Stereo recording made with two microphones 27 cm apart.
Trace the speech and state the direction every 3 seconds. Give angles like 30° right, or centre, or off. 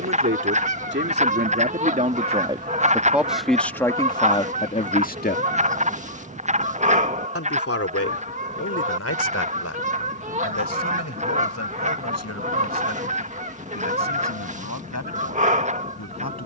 30° right, 20° left, 60° left, 70° left, 80° left, 80° left.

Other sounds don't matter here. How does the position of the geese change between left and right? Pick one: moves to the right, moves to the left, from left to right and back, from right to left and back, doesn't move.
doesn't move.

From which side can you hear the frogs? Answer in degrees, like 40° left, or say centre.
30° right.